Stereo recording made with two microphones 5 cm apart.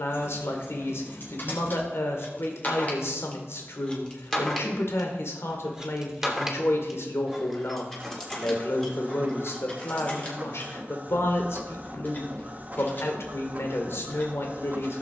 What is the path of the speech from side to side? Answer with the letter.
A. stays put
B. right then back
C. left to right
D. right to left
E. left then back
A.